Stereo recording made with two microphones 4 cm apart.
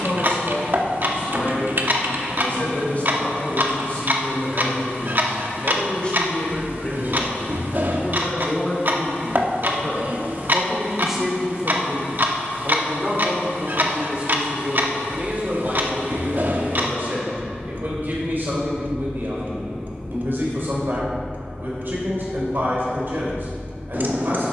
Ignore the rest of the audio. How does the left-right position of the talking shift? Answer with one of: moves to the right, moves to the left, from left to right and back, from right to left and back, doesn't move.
moves to the right.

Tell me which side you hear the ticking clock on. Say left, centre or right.
right.